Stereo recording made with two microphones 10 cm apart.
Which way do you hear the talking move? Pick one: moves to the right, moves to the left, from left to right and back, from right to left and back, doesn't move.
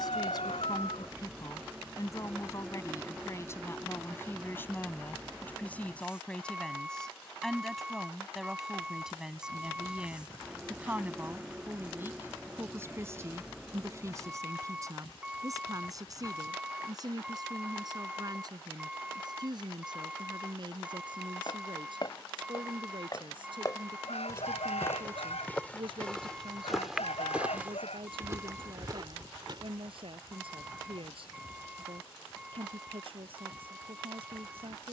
moves to the right.